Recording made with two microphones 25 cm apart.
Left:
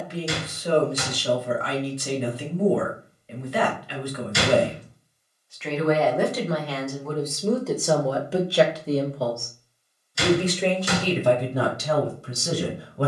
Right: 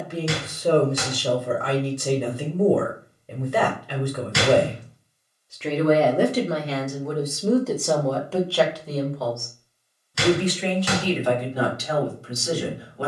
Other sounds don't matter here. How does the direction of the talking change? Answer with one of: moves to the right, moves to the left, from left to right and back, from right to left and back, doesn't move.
moves to the left.